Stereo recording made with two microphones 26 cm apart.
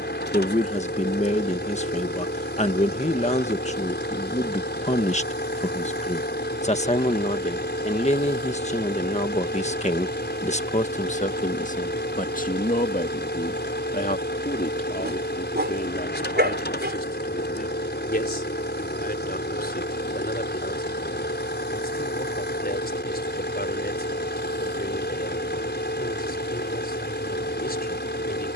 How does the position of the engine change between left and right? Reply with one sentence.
You can hear the engine stay in one place.